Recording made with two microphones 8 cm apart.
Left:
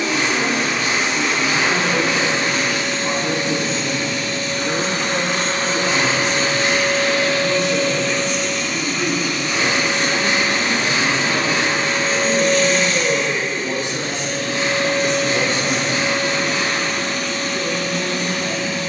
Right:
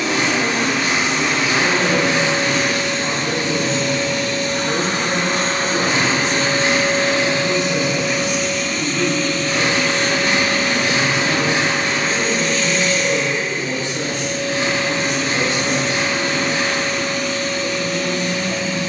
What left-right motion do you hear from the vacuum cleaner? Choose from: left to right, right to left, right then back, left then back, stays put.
right to left.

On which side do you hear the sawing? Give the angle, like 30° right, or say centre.
40° right.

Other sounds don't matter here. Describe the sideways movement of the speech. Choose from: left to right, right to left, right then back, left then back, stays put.
right to left.